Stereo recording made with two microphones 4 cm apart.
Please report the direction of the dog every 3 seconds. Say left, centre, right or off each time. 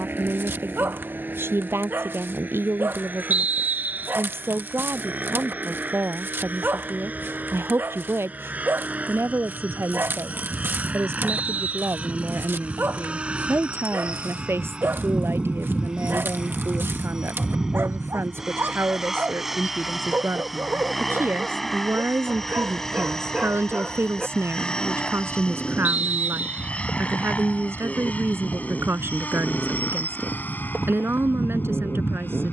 right, right, right, right, right, right, right, right, centre, right, right.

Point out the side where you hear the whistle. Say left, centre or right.
right.